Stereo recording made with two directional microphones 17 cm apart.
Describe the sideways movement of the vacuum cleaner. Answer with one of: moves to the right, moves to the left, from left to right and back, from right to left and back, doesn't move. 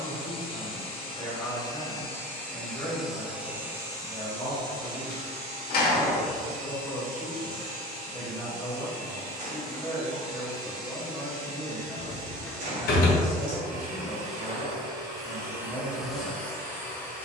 from left to right and back.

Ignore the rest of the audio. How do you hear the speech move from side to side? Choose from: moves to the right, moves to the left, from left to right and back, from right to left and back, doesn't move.
doesn't move.